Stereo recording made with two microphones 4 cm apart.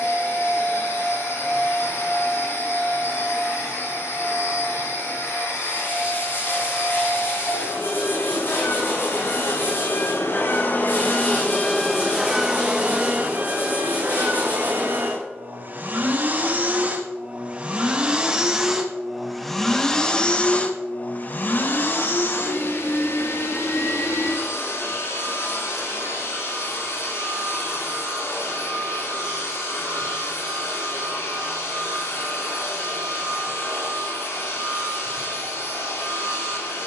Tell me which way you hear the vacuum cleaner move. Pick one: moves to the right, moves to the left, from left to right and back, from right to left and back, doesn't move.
from left to right and back.